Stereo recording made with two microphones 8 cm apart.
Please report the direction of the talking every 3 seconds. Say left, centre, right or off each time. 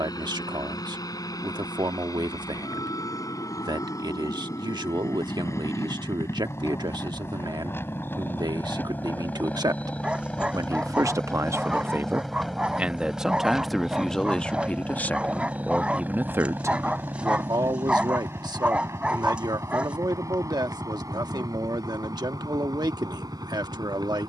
right, right, right, right, centre, right, right, right.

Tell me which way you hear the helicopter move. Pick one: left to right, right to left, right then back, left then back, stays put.
left to right.